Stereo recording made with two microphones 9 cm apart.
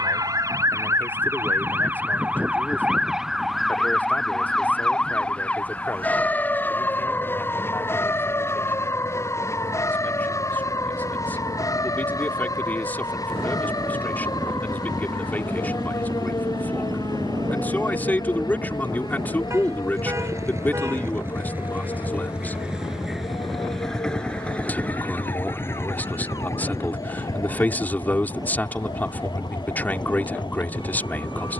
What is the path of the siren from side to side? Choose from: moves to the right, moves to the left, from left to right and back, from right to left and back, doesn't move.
moves to the left.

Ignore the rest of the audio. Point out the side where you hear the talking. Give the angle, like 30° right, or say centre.
20° left.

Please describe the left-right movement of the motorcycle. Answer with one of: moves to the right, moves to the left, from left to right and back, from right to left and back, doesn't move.
moves to the left.